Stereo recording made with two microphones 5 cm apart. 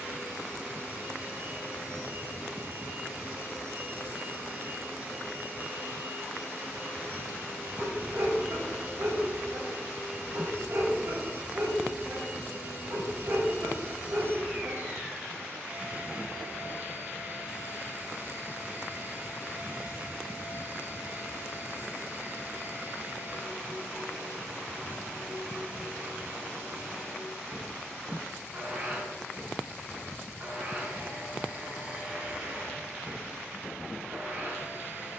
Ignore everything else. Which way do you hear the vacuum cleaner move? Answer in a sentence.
You can hear the vacuum cleaner stay put.